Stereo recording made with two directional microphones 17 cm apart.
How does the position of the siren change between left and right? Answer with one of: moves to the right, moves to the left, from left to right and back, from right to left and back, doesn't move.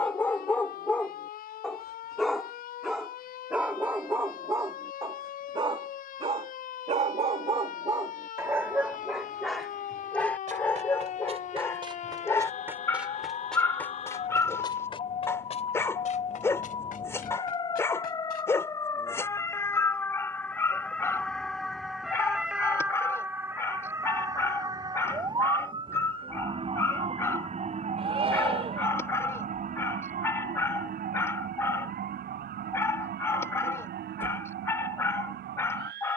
moves to the right.